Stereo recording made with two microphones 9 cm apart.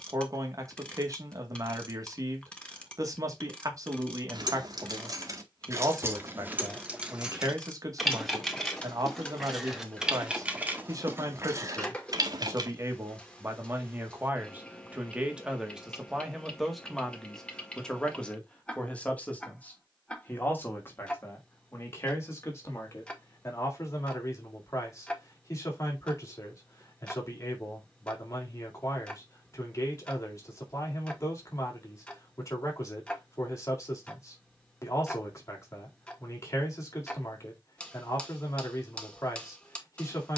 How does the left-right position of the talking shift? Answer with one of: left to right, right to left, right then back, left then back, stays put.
right to left.